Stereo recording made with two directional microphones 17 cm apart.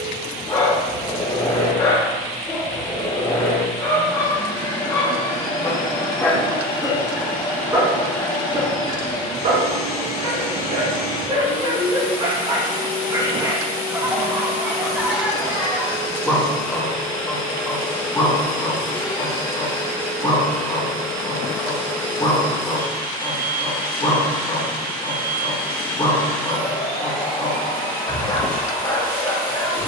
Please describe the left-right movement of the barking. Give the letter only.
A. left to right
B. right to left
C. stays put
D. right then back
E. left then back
D.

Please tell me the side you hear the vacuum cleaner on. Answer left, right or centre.
left.